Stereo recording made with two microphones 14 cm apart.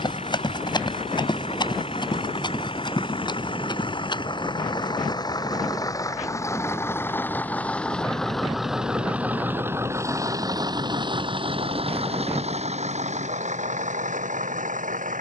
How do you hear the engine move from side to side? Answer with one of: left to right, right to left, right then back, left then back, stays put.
left to right.